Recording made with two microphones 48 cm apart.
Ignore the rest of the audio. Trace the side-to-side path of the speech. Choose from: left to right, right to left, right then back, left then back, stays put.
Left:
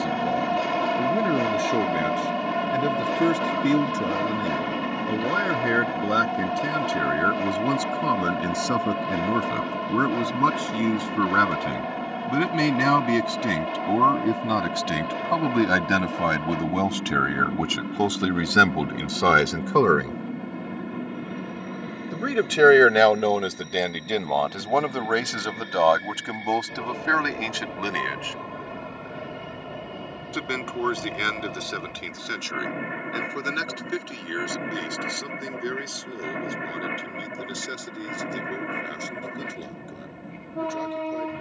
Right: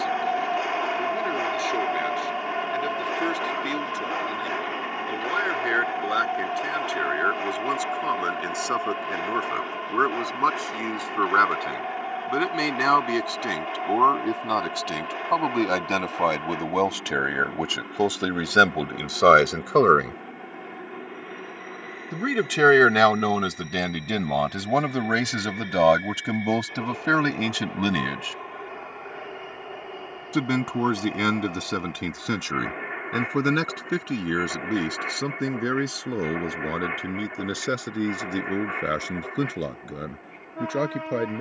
left to right.